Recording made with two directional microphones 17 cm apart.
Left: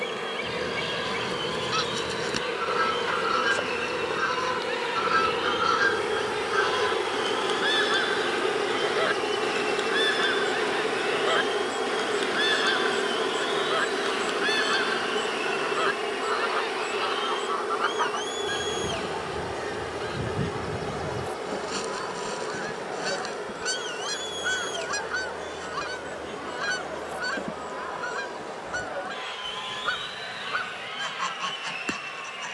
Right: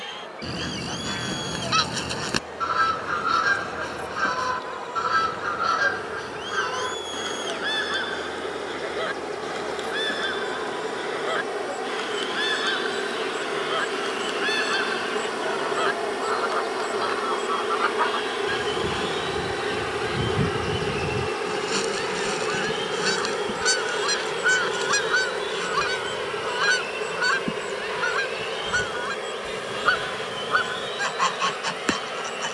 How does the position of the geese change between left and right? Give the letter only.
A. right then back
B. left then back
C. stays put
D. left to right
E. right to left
B.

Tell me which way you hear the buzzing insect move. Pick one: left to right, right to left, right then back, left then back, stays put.
left to right.